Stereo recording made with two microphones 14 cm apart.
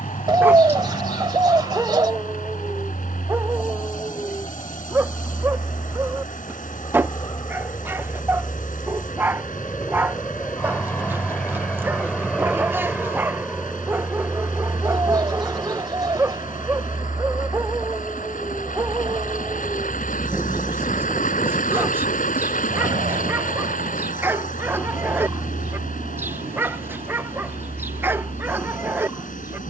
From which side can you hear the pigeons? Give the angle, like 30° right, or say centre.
30° right.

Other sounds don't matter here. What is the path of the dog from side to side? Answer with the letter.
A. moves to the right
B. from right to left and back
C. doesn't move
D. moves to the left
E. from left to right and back
C.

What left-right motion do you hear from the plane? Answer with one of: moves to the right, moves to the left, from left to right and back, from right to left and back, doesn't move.
moves to the right.